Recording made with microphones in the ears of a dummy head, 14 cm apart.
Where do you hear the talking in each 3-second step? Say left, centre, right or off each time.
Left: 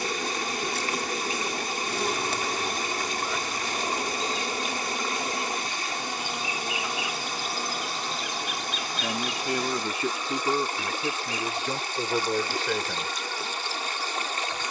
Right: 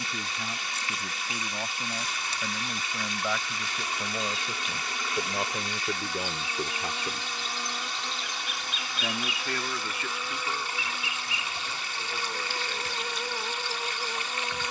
right, right, right, left, left.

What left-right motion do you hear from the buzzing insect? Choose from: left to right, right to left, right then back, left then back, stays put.
left to right.